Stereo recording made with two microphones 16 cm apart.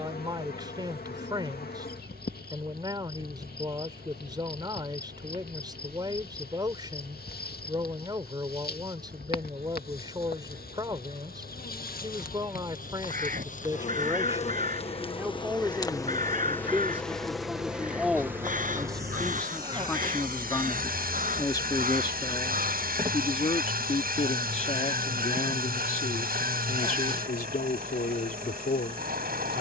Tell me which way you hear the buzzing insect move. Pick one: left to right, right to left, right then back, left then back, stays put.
left to right.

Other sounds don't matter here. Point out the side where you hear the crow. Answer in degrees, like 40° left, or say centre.
60° right.